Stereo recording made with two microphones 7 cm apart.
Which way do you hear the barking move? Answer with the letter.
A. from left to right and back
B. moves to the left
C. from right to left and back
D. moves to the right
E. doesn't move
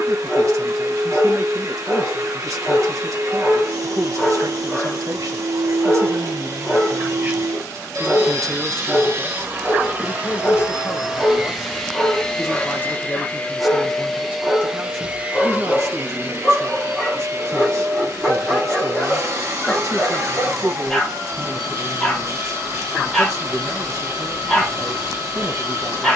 E.